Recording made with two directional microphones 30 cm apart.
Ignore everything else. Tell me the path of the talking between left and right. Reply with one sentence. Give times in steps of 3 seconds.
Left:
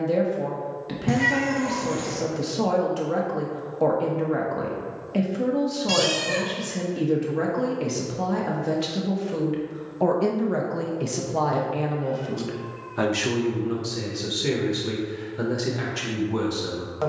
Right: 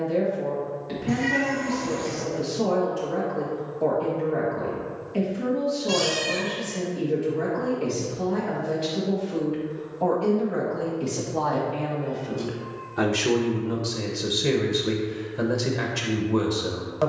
You can hear the talking on the left from 0 s and in the centre from 12 s.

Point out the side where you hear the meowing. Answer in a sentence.
You can hear the meowing on the left.